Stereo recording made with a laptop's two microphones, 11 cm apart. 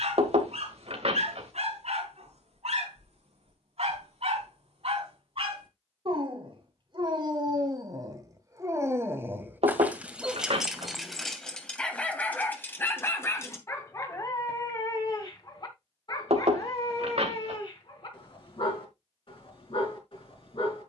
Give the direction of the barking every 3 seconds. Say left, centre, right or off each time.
right, right, right, centre, left, left, left.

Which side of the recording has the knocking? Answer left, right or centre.
right.